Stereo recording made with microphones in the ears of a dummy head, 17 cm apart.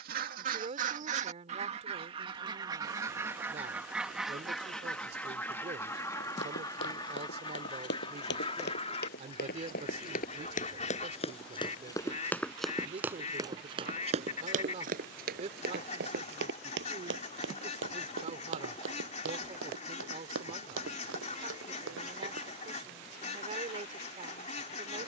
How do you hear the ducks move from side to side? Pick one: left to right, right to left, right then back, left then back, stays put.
right to left.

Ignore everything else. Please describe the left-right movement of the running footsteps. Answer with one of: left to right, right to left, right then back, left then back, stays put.
left to right.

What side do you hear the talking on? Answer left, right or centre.
right.